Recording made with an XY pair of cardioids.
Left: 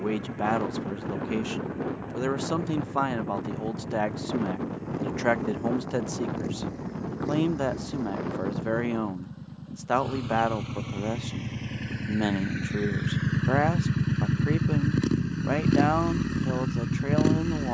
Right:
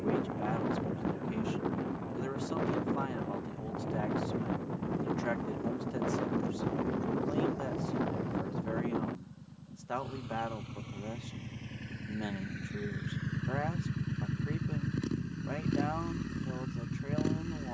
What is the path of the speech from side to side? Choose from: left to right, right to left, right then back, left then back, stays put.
stays put.